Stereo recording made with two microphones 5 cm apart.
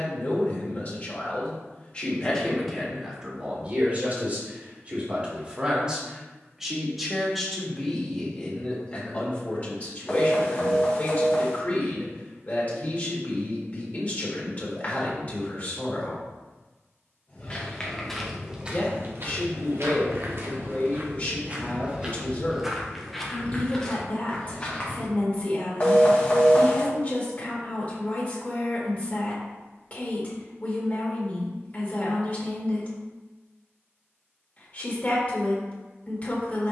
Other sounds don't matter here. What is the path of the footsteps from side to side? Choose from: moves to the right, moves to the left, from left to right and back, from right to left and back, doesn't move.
from left to right and back.